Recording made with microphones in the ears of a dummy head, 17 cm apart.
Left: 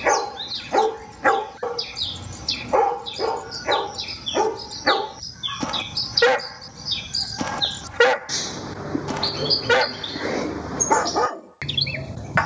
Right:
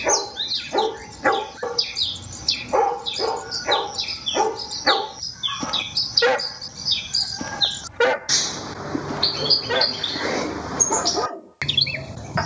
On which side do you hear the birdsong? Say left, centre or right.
right.